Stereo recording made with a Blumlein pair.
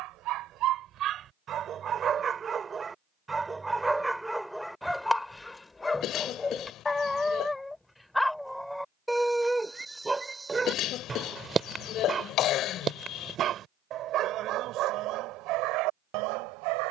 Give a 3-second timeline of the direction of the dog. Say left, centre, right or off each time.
right, centre, centre, centre, right, right.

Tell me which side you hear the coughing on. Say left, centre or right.
left.